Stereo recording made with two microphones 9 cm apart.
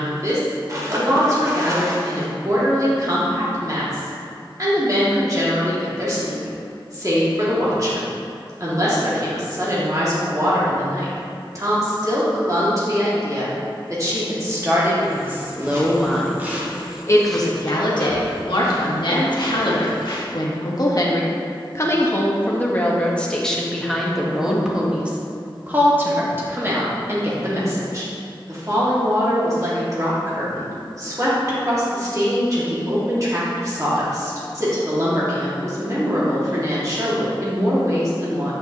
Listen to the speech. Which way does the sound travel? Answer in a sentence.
In this clip you hear the speech go left and come back.